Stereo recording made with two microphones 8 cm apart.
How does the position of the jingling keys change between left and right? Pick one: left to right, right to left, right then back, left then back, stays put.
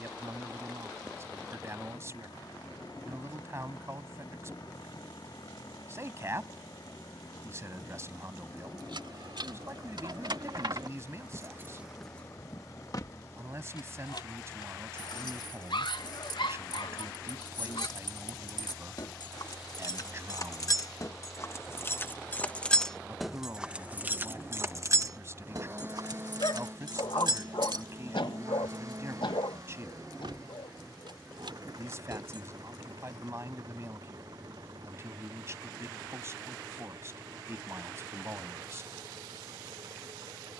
left then back.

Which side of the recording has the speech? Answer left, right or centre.
right.